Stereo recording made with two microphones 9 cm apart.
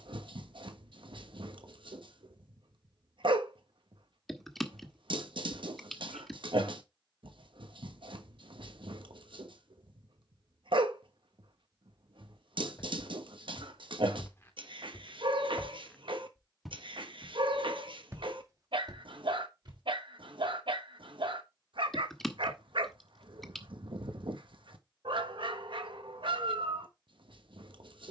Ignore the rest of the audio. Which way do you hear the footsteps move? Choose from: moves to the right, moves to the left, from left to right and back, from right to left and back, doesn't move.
moves to the right.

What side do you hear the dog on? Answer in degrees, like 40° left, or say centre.
70° right.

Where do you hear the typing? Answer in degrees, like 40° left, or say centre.
centre.